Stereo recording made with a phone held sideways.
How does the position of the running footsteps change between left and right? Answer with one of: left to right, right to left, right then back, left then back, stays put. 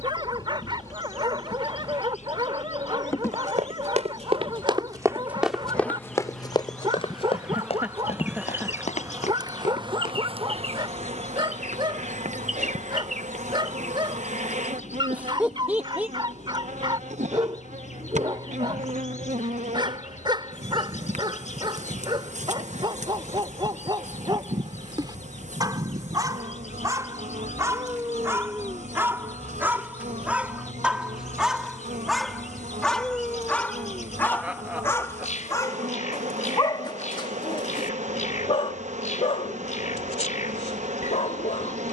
right to left.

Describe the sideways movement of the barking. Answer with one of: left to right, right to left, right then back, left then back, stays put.
right to left.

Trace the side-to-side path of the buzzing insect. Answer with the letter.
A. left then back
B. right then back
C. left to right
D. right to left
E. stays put
C.